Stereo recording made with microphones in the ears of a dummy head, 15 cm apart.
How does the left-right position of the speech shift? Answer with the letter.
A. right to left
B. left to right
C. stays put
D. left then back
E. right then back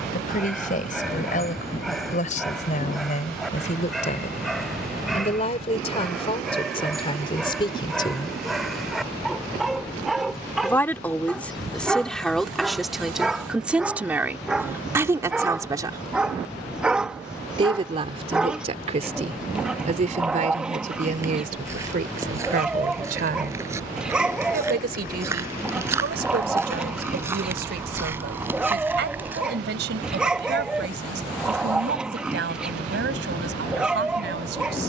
B.